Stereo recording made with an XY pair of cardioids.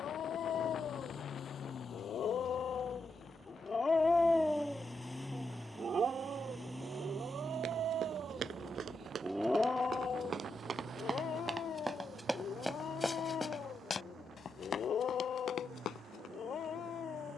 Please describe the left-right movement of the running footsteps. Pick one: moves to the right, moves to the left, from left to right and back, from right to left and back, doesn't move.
moves to the left.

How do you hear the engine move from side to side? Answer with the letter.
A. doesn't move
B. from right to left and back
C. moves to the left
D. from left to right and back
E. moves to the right
E.